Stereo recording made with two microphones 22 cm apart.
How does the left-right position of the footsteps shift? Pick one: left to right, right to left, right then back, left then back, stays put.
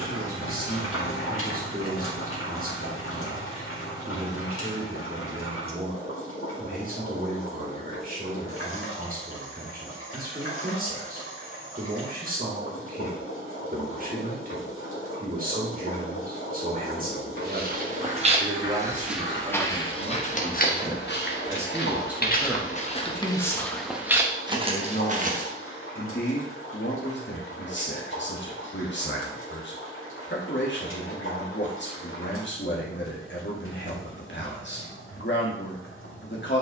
left then back.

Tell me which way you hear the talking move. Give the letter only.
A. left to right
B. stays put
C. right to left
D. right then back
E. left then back
C.